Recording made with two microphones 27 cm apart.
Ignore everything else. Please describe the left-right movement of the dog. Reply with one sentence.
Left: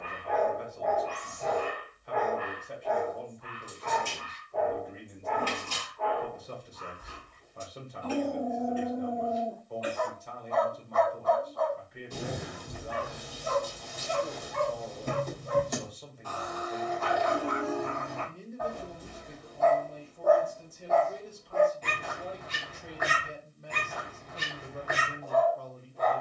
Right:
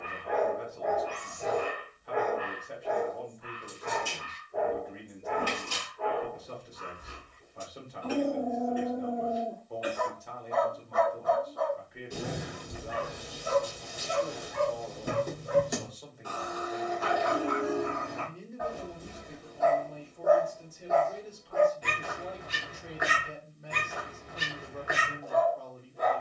You can hear the dog stay in one place.